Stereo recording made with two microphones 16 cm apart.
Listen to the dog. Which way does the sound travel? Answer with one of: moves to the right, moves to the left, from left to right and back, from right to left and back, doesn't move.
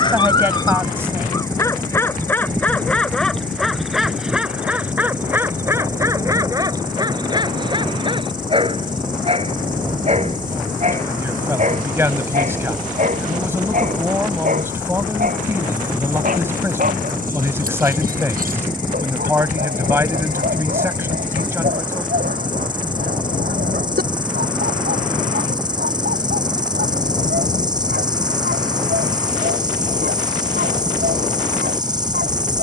moves to the right.